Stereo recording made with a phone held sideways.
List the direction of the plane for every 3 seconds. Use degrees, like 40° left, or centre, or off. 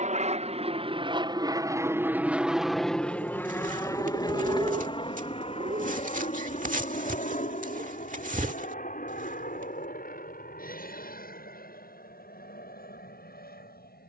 20° right, 20° left, 40° left, 50° left, 60° left.